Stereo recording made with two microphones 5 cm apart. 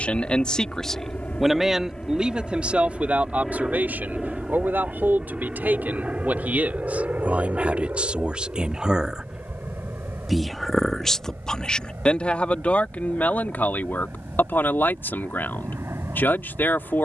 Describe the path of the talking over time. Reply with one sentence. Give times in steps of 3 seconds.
In this clip you hear the talking in the centre from 0 s, on the right from 3 s, in the centre from 9 s and on the left from 12 s.